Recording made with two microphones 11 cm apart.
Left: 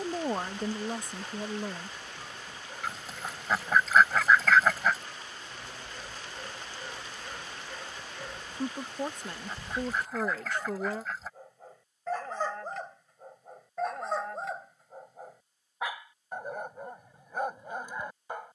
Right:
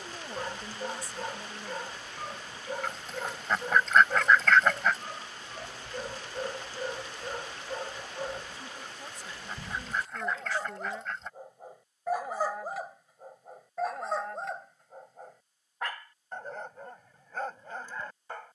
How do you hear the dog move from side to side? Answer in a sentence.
You can hear the dog go from the right side to the left.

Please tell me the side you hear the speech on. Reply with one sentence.
You can hear the speech on the left.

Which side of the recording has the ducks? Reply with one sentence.
You can hear the ducks in the centre.